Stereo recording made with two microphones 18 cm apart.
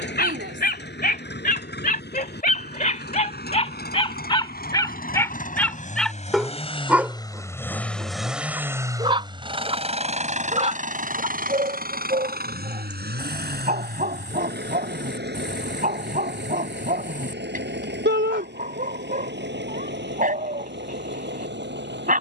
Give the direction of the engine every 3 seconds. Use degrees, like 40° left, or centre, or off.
70° left, 60° left, 10° left, 40° right, 60° right, 70° right, 80° right, 80° right.